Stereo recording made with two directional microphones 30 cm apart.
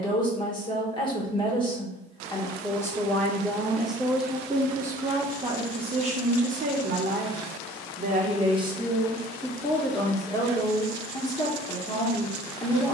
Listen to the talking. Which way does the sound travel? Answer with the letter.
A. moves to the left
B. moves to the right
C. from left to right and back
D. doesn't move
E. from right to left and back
C.